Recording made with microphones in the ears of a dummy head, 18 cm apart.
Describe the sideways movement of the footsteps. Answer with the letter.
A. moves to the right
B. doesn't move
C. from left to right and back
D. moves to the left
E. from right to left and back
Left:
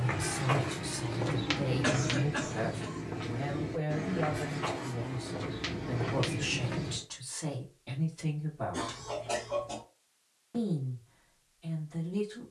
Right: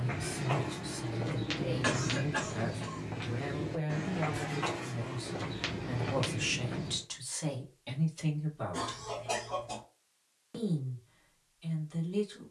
C.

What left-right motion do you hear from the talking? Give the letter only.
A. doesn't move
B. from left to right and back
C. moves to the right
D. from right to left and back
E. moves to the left
C.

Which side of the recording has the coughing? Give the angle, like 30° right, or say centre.
10° right.